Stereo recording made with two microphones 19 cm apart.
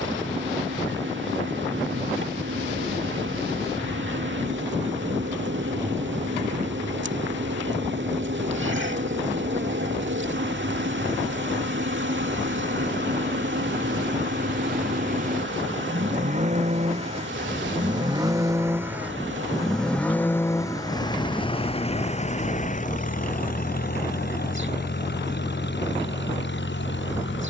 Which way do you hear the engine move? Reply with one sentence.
You can hear the engine go from the right side to the left.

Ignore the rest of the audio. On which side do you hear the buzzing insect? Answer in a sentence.
You can hear the buzzing insect on the right.